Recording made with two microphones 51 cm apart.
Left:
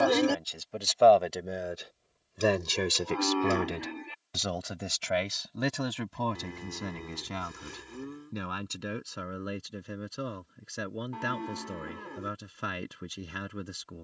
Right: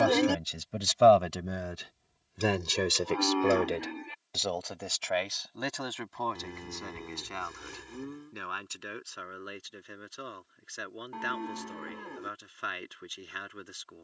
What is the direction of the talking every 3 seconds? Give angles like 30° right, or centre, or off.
30° right, 40° left, 60° left, 70° left, 70° left.